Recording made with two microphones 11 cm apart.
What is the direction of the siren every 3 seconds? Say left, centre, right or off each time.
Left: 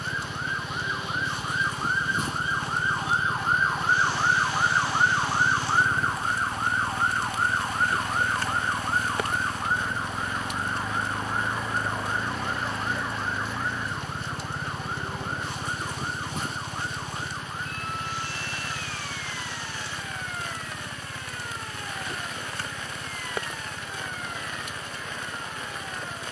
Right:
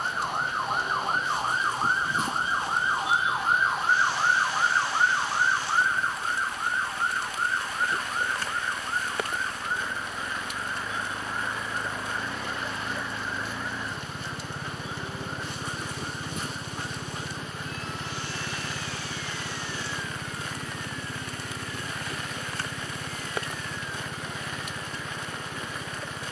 right, centre, left, left, left, left, left, left, left.